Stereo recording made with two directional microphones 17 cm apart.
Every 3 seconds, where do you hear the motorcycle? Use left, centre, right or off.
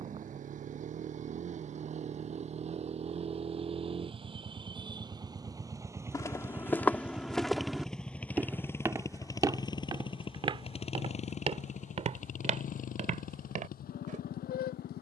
right, right, centre, left, left.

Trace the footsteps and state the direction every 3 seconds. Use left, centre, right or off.
off, off, centre, right, right.